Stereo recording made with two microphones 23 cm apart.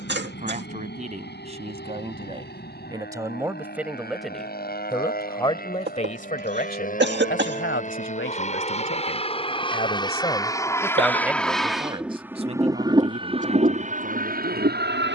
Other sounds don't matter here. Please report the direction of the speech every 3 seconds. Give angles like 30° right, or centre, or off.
30° right, centre, 50° left, 10° left, 40° right.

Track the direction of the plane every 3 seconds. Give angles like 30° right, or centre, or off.
50° left, 50° left, 40° left, 10° left, 30° right.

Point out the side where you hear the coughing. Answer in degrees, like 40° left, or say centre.
50° right.